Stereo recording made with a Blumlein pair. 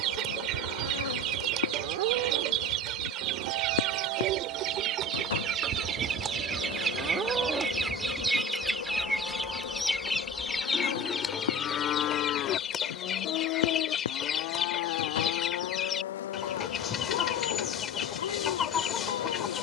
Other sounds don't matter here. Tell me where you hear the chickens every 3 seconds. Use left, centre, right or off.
right, right, centre, centre, left, left, left.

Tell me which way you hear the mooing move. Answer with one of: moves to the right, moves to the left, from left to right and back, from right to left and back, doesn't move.
moves to the left.